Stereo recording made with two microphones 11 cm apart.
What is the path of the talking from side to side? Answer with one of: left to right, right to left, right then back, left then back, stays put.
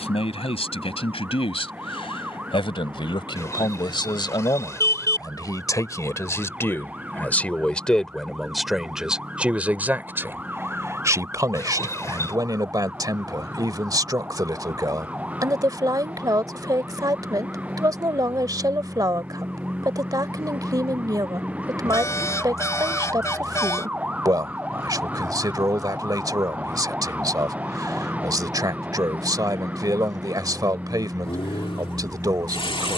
left to right.